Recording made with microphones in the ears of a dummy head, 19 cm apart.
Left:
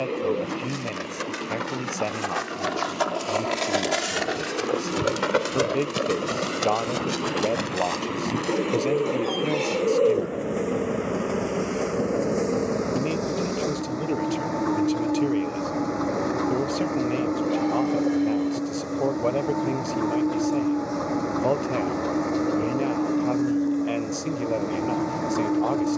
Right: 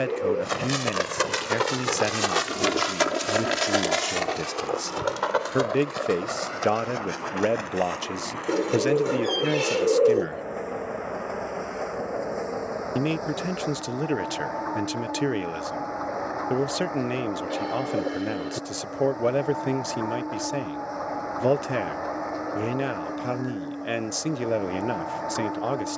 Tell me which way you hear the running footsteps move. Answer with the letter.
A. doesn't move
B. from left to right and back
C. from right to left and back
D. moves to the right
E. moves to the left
E.